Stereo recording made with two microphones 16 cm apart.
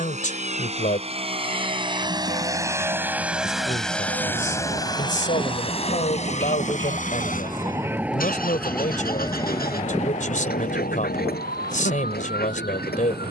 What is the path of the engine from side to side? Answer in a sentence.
You can hear the engine move from right to left.